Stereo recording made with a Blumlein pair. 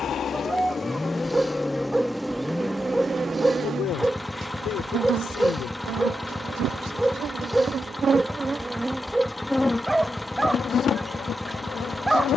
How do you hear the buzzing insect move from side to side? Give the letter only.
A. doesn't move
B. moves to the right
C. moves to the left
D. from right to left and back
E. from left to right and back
E.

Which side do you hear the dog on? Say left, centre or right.
centre.